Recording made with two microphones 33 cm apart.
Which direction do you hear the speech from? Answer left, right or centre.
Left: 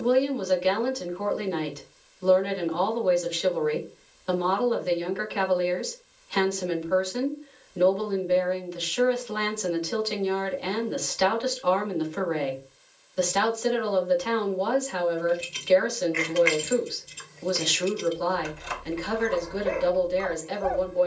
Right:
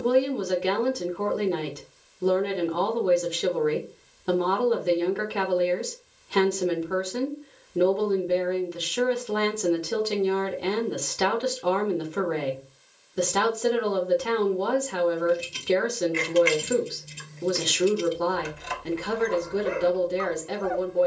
right.